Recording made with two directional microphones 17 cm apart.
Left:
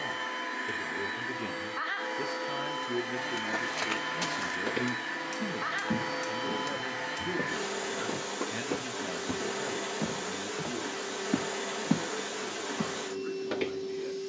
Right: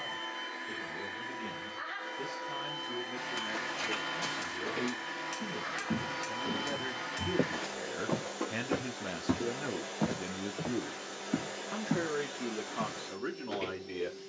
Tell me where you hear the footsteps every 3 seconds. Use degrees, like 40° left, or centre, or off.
off, 50° left, 20° right, centre, 50° left.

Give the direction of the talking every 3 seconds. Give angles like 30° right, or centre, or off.
50° left, 30° left, centre, 30° right, 50° right.